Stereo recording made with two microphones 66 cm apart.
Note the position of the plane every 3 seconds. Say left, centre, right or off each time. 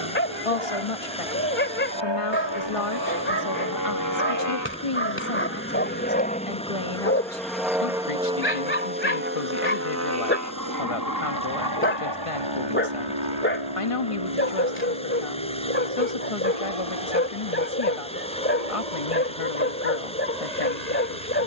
left, left, centre, right, right, right, right.